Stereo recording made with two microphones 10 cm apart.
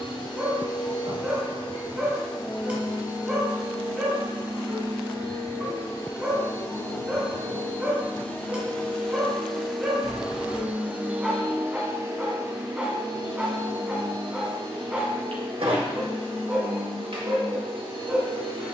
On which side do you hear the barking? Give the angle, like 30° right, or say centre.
10° right.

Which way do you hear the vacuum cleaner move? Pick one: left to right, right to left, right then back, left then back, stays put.
left to right.